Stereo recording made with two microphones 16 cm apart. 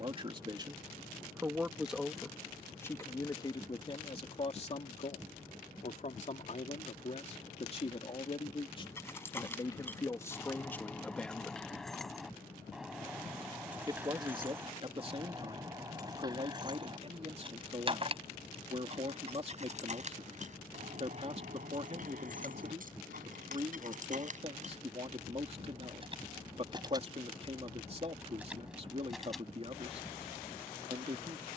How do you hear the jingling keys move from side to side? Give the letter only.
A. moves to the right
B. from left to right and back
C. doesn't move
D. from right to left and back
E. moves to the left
B.